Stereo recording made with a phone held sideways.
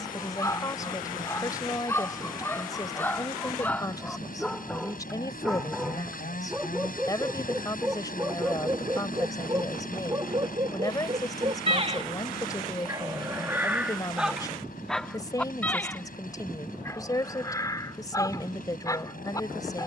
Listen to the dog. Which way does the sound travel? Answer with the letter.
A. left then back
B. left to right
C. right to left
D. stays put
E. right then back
E.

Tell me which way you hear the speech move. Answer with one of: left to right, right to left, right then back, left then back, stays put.
stays put.